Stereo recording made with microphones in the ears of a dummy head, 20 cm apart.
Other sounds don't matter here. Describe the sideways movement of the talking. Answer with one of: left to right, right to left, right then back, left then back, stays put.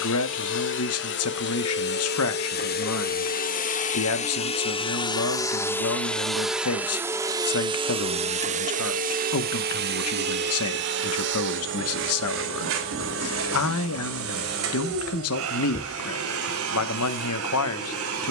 stays put.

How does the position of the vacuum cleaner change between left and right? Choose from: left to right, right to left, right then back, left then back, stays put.
left to right.